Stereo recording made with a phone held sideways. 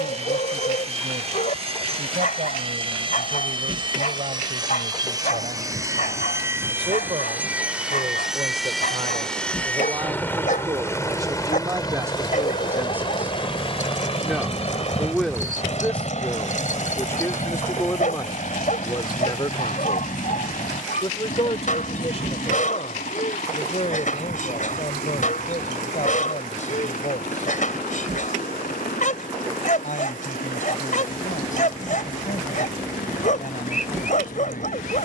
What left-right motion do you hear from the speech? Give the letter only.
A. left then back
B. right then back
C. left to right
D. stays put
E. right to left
E.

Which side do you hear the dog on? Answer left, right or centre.
left.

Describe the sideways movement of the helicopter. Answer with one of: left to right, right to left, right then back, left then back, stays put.
right to left.